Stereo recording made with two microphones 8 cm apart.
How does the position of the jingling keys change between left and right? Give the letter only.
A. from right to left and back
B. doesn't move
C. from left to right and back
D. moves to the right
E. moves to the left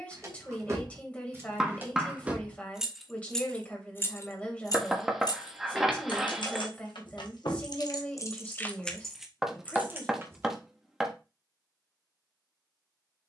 A.